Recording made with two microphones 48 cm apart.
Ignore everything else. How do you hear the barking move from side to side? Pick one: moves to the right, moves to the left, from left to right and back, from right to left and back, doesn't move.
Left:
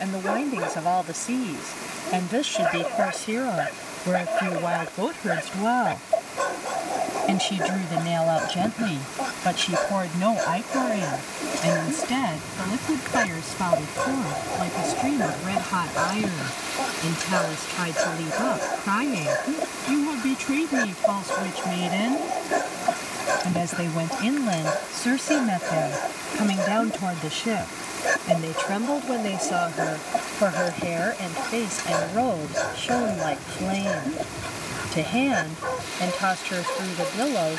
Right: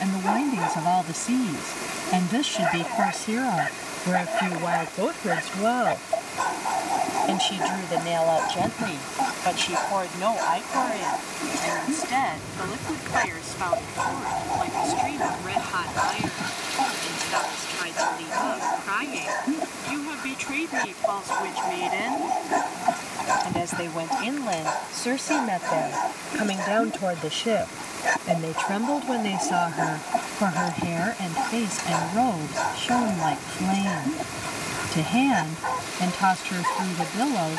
doesn't move.